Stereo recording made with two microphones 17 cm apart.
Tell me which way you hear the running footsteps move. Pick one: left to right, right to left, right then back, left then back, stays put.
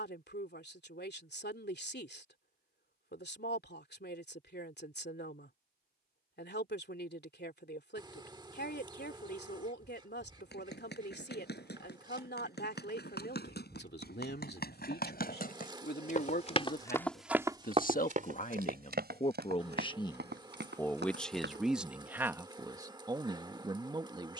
left to right.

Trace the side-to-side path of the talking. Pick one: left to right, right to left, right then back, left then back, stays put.
left to right.